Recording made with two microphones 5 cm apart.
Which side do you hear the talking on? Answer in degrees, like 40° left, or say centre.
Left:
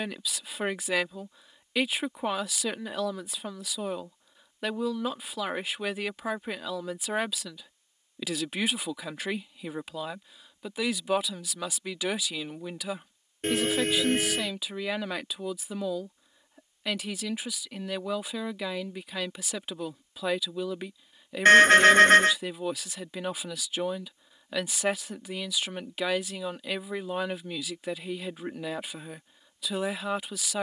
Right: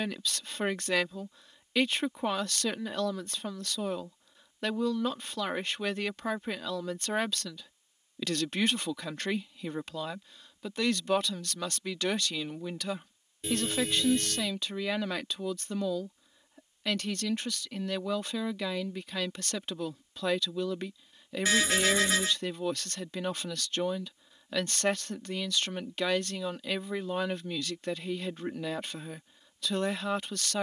10° left.